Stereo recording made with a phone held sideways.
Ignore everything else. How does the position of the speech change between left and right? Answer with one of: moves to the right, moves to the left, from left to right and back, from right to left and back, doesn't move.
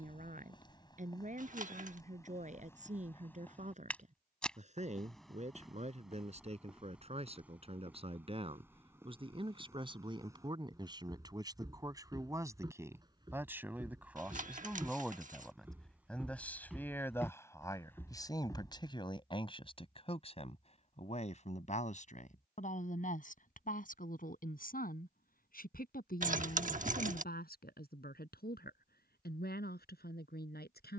moves to the left.